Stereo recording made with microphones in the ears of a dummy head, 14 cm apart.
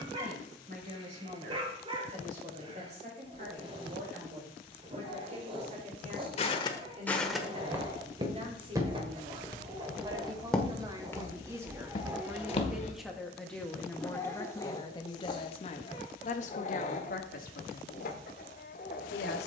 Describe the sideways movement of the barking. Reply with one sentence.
You can hear the barking travel towards the left.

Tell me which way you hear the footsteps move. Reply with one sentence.
In this clip you hear the footsteps move from left to right and back again.